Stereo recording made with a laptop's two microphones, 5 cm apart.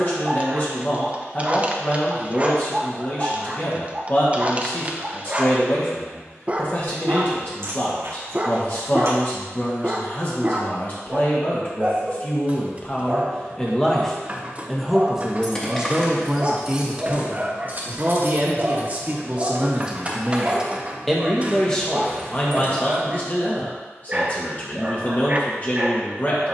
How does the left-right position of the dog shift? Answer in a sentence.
You can hear the dog stay put.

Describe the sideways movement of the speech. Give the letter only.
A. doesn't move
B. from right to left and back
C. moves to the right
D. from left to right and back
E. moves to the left
D.